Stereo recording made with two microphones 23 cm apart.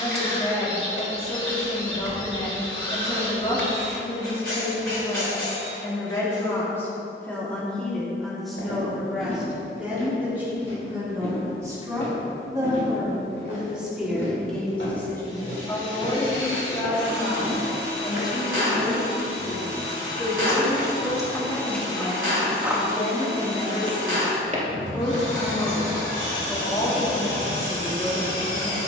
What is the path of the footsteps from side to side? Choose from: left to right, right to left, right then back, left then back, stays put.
left to right.